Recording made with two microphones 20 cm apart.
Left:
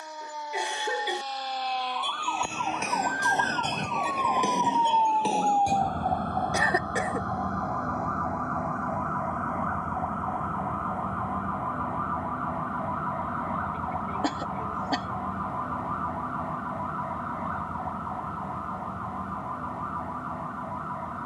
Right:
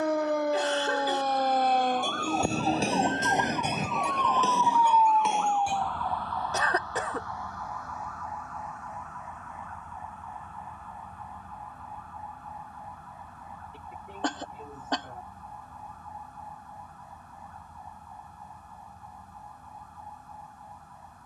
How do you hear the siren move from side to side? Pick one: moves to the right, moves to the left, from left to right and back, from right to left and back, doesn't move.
moves to the left.